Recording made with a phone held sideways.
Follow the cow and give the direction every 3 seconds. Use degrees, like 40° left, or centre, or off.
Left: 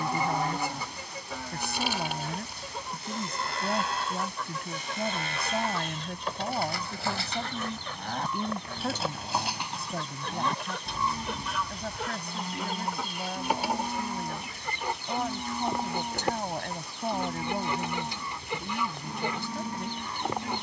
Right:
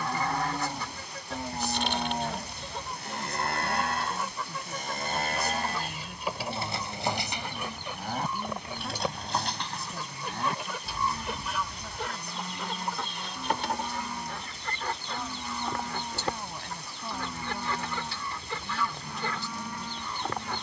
30° right, 50° right, 10° right, 20° left, 30° left, 30° left, 30° left.